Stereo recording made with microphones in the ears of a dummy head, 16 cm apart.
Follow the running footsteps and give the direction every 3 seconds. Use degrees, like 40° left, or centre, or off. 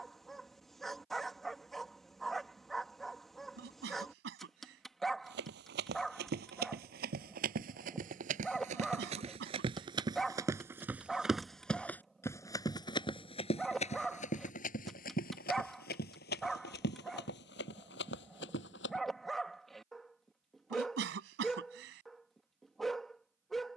off, 60° right, 50° right, 20° right, 30° left, 60° left, 70° left, off.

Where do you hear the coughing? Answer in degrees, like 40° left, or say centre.
70° right.